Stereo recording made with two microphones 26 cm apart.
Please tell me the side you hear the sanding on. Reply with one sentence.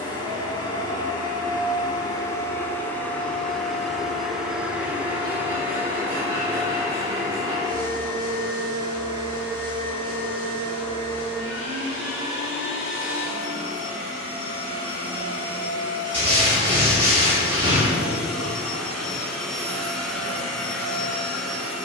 In this clip you hear the sanding on the right.